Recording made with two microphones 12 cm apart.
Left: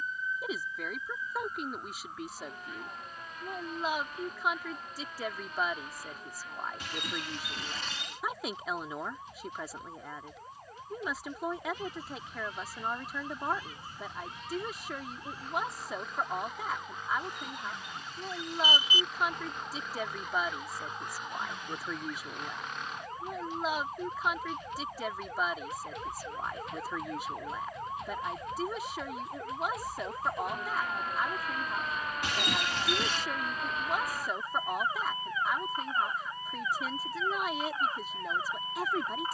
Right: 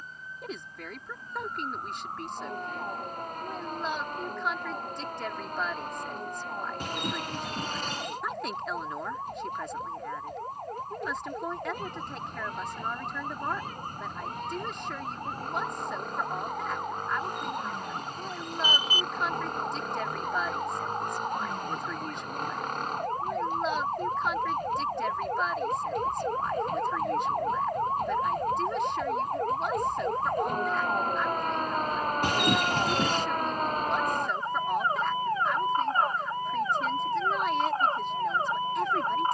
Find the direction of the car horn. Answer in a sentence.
You can hear the car horn on the right.